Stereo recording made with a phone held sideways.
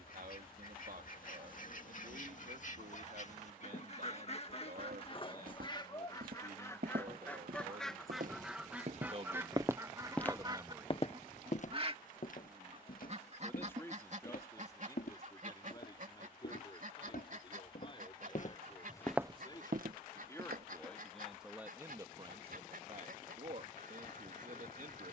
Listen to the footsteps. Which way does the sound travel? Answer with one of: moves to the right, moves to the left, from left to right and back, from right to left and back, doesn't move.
from right to left and back.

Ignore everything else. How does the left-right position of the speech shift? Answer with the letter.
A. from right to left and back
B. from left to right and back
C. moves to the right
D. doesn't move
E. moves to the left
A.